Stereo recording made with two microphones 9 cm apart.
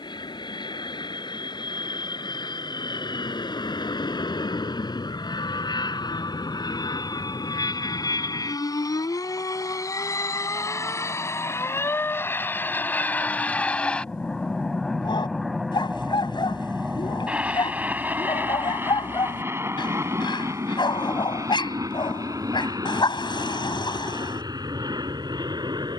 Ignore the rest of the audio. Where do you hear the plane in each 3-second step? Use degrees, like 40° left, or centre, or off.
70° left, 60° left, 50° left, 40° left, 20° left, 10° right, 30° right, 40° right, 50° right.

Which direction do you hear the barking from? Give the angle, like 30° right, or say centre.
60° left.